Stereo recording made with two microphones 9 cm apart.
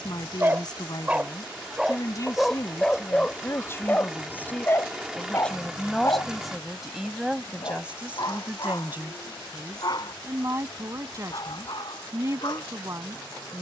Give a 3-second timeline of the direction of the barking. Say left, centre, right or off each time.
centre, left, left, left, left.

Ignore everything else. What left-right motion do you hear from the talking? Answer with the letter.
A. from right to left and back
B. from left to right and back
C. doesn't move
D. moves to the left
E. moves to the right
E.